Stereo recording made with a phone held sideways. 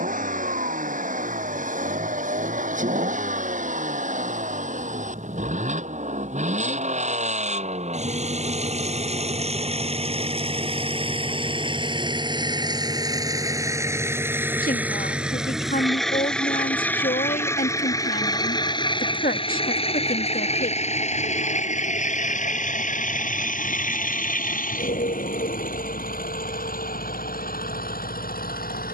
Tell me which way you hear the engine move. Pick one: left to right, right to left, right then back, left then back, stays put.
right to left.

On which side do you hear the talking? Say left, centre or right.
left.